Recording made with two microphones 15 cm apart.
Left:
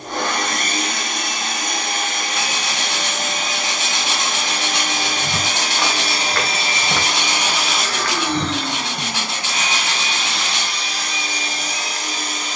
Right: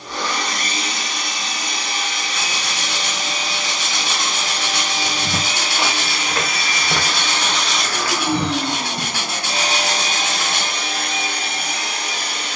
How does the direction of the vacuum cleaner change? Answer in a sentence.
You can hear the vacuum cleaner move to the right.